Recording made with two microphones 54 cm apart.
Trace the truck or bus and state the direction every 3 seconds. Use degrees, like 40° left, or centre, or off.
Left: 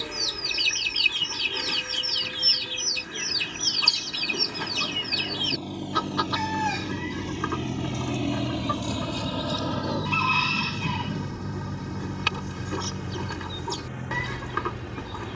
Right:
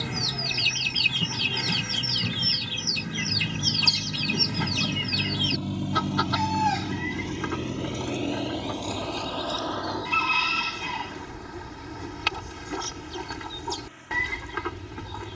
70° right, 50° right, 10° left, 50° left, 70° left.